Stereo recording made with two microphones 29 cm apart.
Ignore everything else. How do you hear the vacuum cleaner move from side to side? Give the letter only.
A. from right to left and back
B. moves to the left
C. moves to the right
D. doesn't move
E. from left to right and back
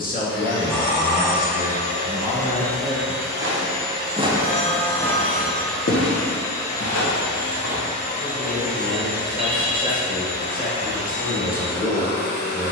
E.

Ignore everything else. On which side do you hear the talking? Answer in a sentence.
In this clip you hear the talking on the left.